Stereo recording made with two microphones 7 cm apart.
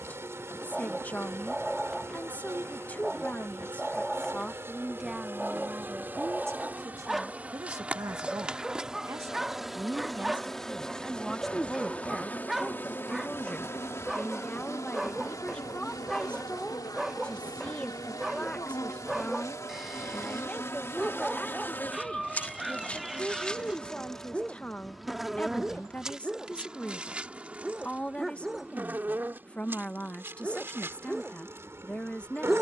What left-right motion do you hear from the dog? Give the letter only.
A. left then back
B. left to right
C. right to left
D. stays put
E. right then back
D.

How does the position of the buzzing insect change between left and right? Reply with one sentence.
You can hear the buzzing insect move from right to left and back again.